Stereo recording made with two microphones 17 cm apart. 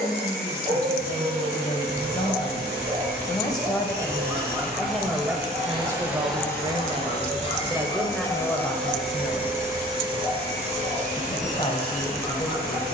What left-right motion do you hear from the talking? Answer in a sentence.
In this clip you hear the talking move from left to right and back again.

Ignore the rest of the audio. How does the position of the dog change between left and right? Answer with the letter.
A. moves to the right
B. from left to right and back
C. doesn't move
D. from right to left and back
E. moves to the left
E.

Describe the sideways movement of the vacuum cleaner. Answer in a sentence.
In this clip you hear the vacuum cleaner go left and come back.